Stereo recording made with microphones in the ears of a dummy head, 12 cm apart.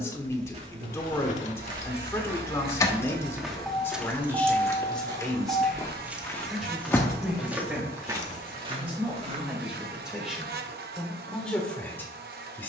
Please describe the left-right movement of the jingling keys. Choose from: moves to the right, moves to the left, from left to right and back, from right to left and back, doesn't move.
from left to right and back.